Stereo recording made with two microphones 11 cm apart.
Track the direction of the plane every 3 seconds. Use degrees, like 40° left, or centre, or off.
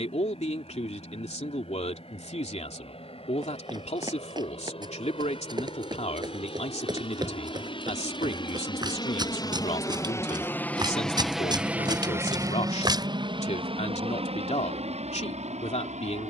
80° left, 70° left, 60° left, 20° left, 40° right, 60° right.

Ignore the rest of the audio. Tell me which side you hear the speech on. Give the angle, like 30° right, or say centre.
80° left.